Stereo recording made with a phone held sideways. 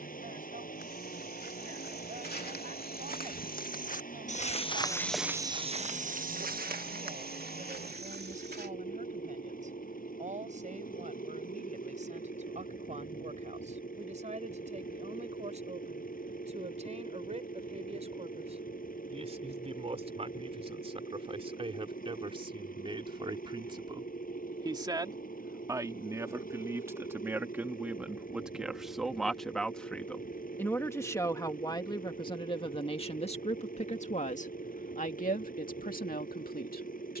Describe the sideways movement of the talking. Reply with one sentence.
In this clip you hear the talking move to the left.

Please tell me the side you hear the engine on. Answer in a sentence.
You can hear the engine on the left.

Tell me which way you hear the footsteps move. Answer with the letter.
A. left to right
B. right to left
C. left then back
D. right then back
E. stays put
A.